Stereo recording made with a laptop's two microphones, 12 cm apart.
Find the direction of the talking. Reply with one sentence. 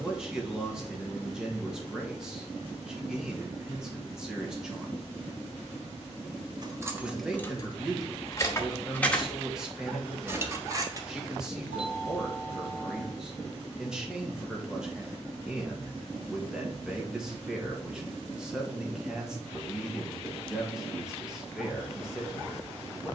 You can hear the talking in the centre.